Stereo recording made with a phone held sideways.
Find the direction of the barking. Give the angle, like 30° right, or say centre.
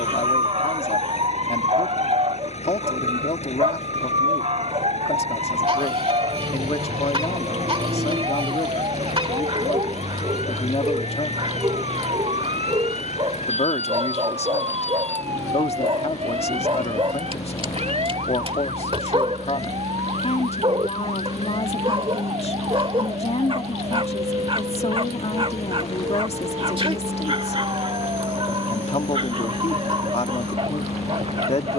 50° right.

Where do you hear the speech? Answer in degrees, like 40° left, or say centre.
50° left.